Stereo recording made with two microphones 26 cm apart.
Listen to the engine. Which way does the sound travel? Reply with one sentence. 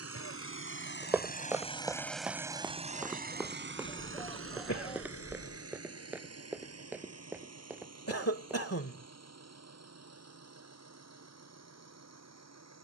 In this clip you hear the engine move from left to right.